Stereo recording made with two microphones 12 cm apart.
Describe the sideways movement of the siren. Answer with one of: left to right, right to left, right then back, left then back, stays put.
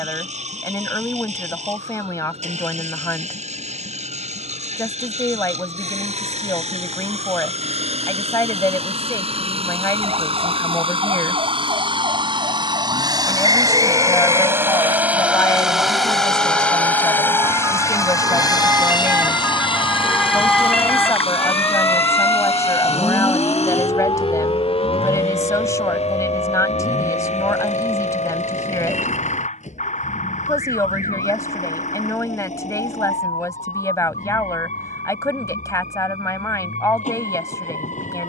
right to left.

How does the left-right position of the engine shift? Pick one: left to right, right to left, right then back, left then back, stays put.
right to left.